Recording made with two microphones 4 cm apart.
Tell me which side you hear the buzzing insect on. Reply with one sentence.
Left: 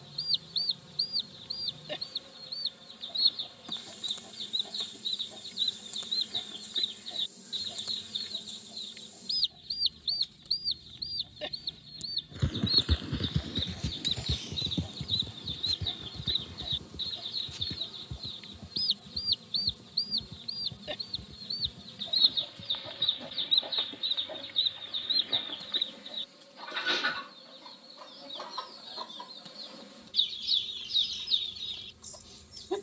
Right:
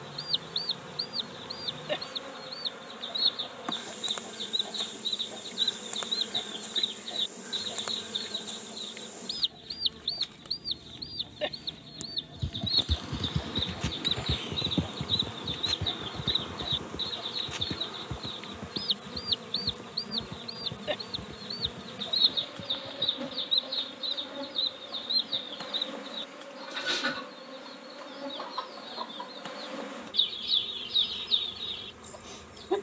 In this clip you hear the buzzing insect on the right.